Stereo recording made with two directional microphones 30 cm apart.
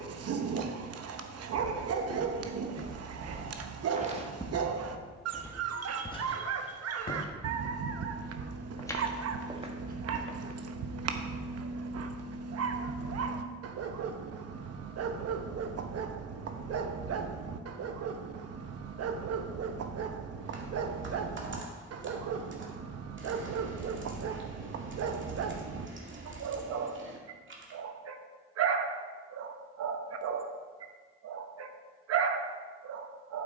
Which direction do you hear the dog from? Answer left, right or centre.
right.